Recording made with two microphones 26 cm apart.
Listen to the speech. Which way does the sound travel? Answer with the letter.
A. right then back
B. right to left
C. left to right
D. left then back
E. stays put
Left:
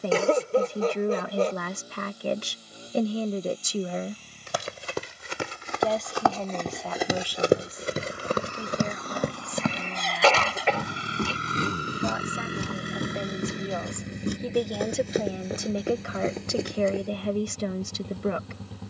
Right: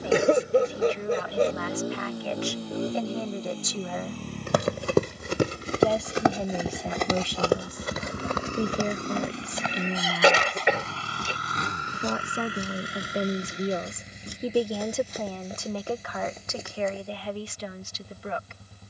A.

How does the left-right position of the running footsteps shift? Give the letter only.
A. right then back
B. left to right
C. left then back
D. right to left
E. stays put
D.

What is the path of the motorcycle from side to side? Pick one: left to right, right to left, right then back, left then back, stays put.
right to left.